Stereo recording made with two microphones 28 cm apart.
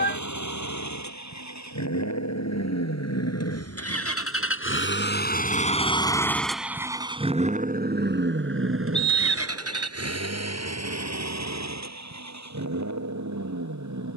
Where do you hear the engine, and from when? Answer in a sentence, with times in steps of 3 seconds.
You can hear the engine on the left from 0 s and on the right from 6 s.